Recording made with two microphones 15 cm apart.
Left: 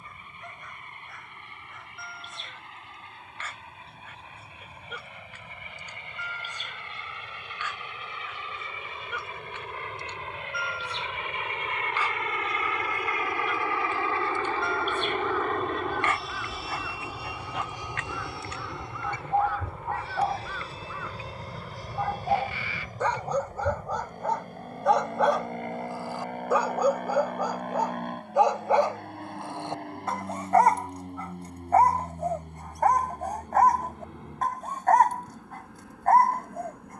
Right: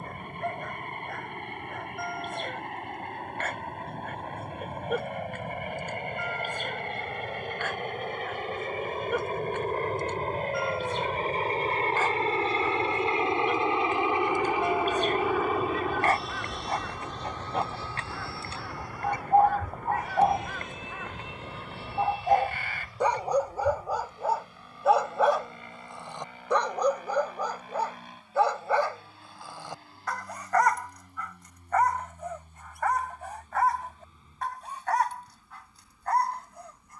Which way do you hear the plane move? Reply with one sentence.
In this clip you hear the plane move to the left.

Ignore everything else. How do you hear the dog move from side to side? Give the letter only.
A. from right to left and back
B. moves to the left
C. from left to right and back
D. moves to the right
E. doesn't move
B.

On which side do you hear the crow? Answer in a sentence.
In this clip you hear the crow on the right.